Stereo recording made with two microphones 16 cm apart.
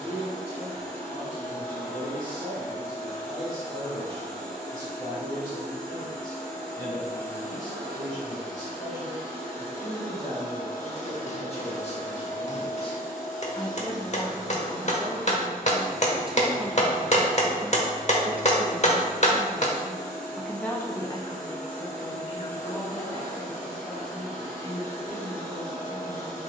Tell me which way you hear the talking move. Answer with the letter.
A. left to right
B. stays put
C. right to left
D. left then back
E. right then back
E.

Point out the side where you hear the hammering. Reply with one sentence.
In this clip you hear the hammering on the left.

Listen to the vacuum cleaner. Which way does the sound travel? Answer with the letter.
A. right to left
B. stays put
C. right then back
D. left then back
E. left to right
B.